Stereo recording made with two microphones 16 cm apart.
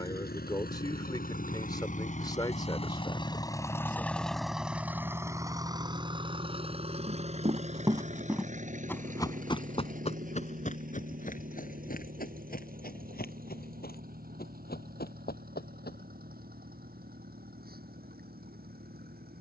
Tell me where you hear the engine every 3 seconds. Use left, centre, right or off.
left, centre, right, right, right, right, right.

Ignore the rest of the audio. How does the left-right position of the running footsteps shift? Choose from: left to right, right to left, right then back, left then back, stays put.
right to left.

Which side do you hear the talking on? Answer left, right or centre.
left.